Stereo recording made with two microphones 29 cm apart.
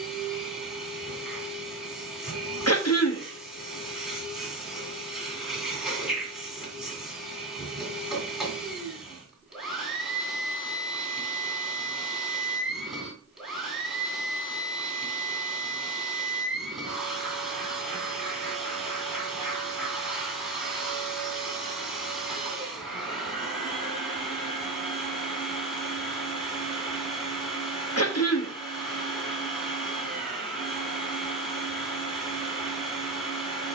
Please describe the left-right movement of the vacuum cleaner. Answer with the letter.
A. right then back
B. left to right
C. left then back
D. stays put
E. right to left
D.